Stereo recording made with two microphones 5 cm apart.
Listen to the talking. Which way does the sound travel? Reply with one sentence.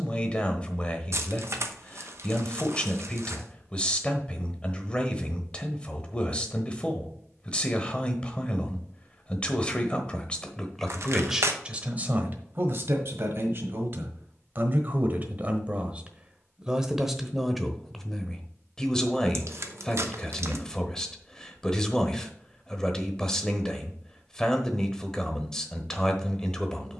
You can hear the talking move from left to right and back again.